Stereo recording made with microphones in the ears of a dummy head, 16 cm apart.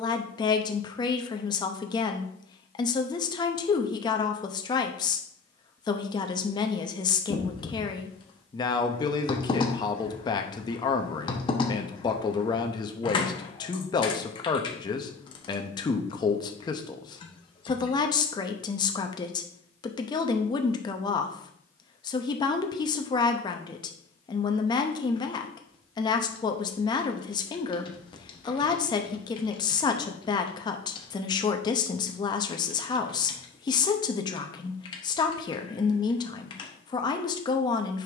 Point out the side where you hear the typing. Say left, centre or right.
left.